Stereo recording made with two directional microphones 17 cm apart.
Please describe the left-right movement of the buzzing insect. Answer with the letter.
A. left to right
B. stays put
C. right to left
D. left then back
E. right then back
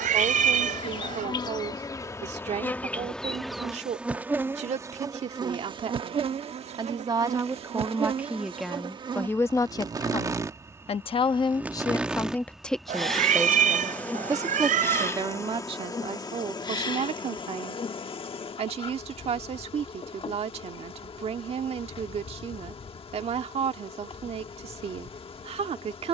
E.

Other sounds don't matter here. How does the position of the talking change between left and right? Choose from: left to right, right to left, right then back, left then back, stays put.
left then back.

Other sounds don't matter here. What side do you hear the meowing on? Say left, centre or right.
right.